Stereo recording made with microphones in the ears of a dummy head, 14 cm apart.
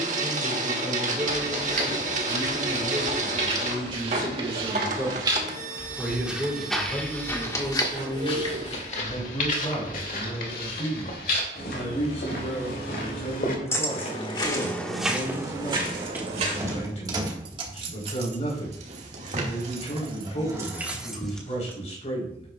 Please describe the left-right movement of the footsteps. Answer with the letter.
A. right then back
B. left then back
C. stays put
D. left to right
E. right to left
B.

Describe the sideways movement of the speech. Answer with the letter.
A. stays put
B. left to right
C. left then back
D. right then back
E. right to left
E.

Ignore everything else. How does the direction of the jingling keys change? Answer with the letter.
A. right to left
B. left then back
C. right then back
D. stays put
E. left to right
C.